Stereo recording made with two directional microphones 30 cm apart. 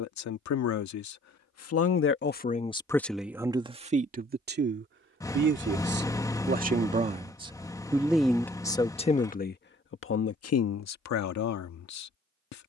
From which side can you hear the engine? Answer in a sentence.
You can hear the engine in the centre.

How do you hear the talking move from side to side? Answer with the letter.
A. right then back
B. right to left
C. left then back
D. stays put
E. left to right
A.